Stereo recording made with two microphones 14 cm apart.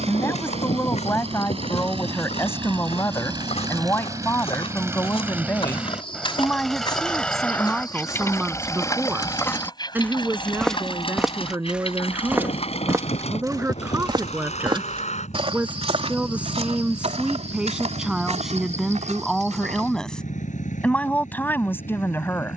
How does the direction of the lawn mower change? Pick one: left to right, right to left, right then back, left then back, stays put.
right to left.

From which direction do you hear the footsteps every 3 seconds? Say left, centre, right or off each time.
left, left, left, centre, right, right, right, off.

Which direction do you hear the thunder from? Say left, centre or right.
left.